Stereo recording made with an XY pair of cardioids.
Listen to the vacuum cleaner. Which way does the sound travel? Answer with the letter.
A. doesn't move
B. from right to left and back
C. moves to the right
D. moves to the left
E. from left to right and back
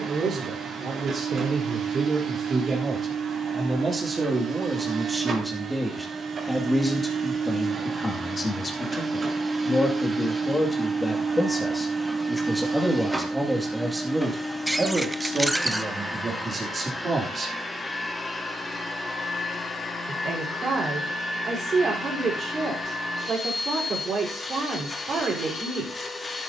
D.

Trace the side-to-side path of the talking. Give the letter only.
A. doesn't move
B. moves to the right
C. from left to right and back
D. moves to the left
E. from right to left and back
E.